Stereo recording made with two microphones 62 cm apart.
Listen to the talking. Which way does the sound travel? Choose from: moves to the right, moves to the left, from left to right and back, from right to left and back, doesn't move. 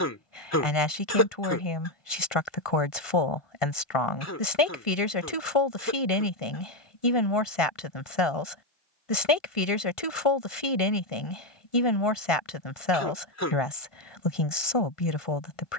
doesn't move.